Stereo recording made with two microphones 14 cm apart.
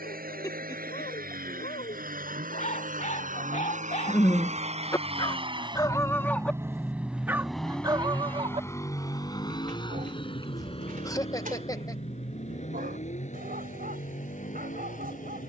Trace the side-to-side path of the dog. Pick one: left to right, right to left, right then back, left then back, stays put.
left to right.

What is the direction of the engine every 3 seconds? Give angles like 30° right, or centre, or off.
70° right, 50° right, centre, 40° left, 50° left.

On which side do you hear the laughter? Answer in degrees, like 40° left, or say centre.
20° left.